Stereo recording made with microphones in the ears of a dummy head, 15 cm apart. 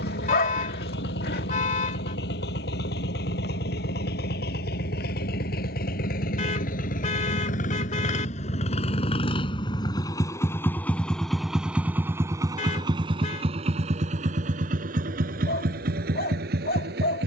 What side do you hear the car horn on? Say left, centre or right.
left.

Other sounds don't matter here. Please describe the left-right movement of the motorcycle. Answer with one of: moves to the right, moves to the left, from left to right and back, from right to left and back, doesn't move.
moves to the right.